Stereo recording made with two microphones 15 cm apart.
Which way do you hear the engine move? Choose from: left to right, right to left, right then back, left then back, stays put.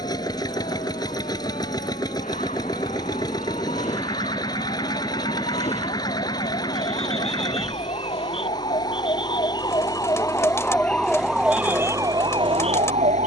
stays put.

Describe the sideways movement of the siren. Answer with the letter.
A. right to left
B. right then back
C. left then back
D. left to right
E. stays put
D.